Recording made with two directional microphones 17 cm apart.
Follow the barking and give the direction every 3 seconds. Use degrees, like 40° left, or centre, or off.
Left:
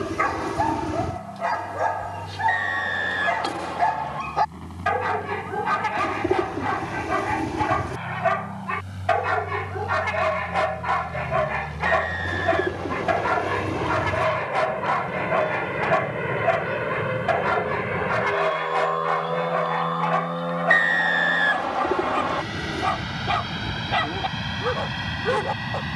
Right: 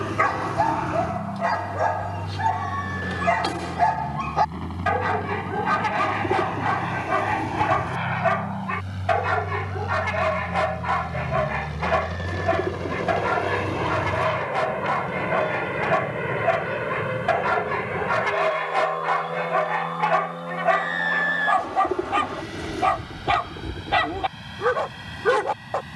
30° right, 30° right, 20° right, 10° right, 10° left, 10° left, 10° right, 20° right, 20° right.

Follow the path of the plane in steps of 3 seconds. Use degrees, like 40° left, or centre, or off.
60° right, 60° right, 50° right, 30° right, 10° right, 10° left, 30° left, 50° left, 60° left.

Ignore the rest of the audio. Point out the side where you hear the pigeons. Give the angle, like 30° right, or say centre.
10° left.